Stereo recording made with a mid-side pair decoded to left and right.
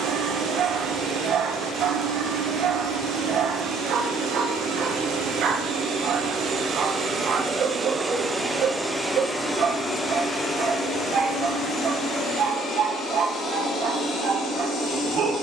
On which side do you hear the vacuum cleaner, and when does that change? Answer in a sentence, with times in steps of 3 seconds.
You can hear the vacuum cleaner on the right from 0 s and on the left from 9 s.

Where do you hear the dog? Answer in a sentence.
You can hear the dog on the right.